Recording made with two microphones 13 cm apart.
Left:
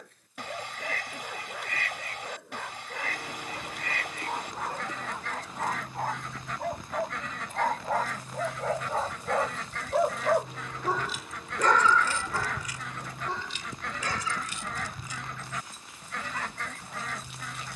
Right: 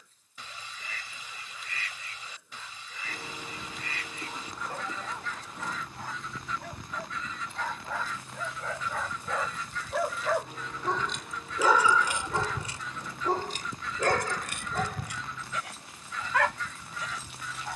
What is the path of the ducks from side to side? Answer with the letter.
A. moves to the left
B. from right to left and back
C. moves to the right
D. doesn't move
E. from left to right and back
D.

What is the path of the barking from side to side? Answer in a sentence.
You can hear the barking move to the right.